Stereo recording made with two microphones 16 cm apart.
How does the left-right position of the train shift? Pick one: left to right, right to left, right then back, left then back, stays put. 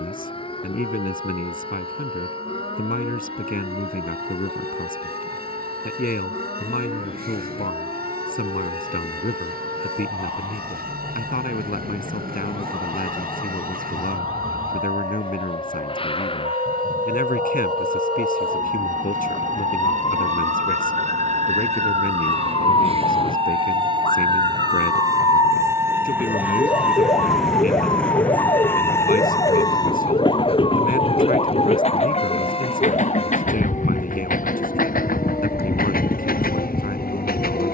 right to left.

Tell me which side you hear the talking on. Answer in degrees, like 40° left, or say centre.
60° left.